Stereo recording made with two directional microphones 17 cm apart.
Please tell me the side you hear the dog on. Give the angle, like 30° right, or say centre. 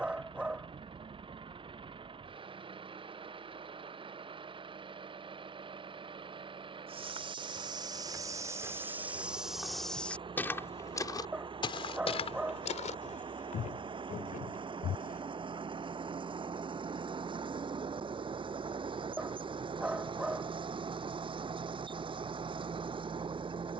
10° right.